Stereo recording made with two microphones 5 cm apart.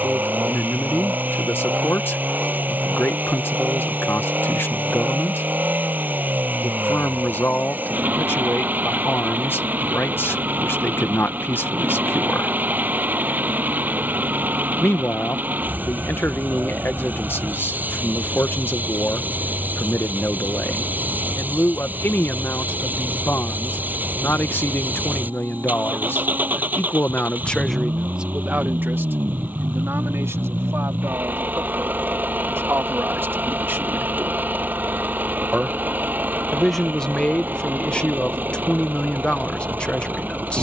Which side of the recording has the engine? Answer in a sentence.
You can hear the engine on the right.